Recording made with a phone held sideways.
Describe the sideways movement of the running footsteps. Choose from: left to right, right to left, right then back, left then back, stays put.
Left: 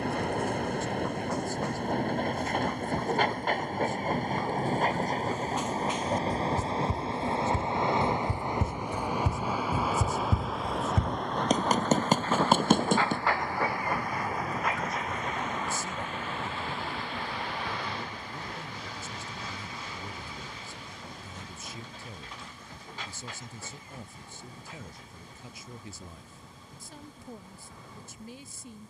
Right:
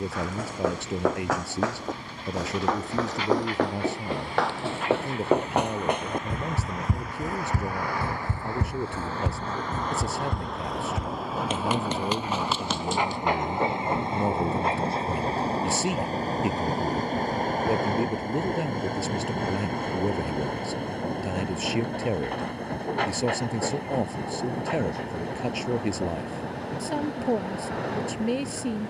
right to left.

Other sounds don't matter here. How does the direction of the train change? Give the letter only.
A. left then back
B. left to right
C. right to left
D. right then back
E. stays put
B.